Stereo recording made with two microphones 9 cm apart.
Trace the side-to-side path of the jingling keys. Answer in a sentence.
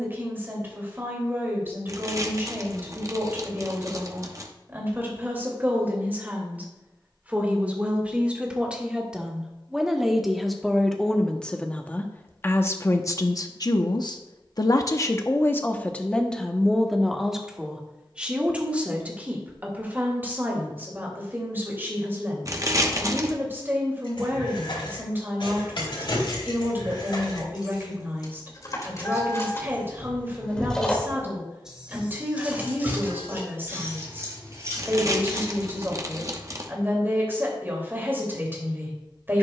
You can hear the jingling keys go from the left side to the right.